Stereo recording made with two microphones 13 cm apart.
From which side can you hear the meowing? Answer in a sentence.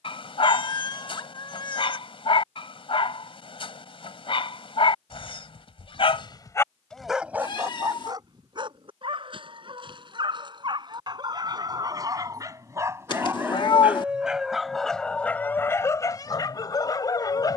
You can hear the meowing on the left.